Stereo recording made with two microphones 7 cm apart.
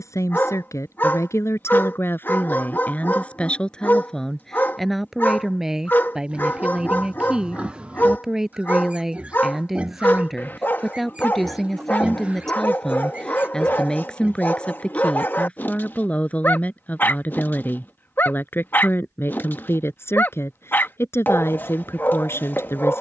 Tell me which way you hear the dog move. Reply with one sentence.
In this clip you hear the dog stay in one place.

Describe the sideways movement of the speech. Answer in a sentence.
In this clip you hear the speech move from left to right and back again.